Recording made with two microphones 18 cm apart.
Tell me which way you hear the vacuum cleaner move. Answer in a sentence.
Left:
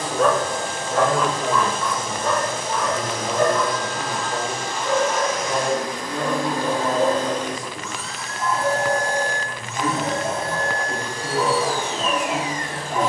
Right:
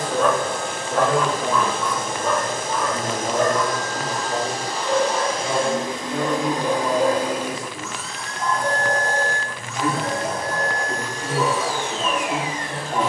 In this clip you hear the vacuum cleaner move from right to left.